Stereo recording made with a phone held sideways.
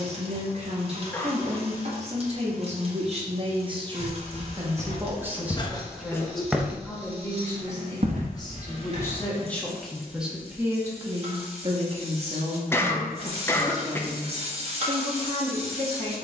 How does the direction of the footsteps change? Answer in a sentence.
In this clip you hear the footsteps go from the left side to the right.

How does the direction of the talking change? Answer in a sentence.
You can hear the talking move from right to left and back again.